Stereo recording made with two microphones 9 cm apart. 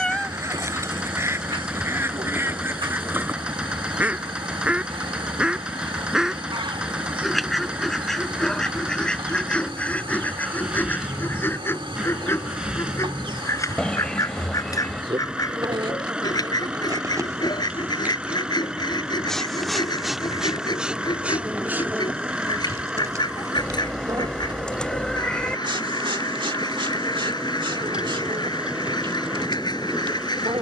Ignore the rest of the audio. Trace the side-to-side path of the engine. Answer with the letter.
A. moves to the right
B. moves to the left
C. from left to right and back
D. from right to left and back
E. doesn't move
E.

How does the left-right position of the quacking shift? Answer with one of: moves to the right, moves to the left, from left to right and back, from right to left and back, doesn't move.
moves to the left.